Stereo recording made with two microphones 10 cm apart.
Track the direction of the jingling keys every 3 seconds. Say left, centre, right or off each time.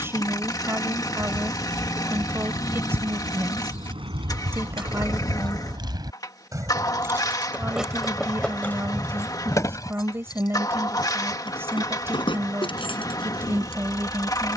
right, right, centre, left, left.